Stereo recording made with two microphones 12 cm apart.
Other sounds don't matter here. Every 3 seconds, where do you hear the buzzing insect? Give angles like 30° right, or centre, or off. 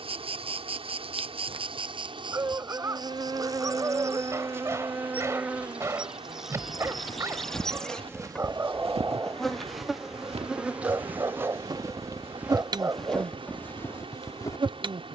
50° right, 20° right, centre, 10° right, 40° right.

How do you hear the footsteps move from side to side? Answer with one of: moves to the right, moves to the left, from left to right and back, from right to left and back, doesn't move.
from left to right and back.